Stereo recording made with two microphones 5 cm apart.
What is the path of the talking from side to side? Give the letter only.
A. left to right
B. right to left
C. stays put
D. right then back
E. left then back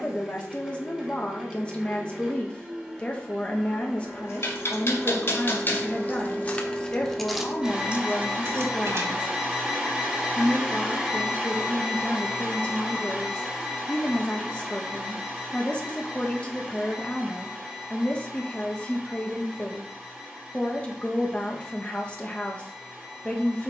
C.